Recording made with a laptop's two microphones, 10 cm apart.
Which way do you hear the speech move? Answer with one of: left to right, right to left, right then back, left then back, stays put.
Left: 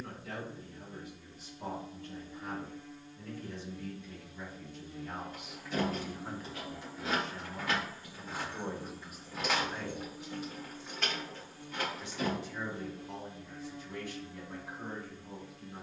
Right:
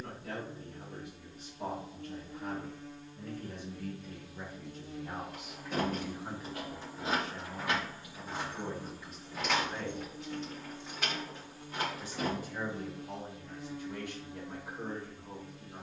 left then back.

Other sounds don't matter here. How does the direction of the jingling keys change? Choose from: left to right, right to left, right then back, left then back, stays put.
left then back.